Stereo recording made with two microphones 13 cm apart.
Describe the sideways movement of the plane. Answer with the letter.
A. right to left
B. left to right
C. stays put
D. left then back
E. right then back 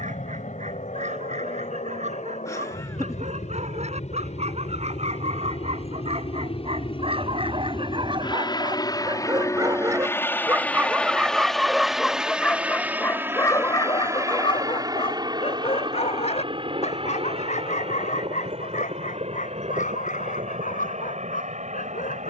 B.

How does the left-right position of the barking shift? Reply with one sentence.
In this clip you hear the barking move from right to left.